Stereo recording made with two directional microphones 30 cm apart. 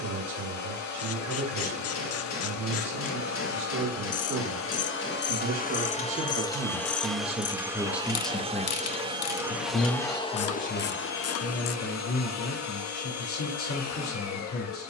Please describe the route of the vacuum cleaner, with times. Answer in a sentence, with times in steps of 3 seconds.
You can hear the vacuum cleaner on the left from 0 s, in the centre from 6 s and on the left from 9 s.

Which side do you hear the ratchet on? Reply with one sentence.
You can hear the ratchet on the left.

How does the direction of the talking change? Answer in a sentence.
You can hear the talking go from the right side to the left.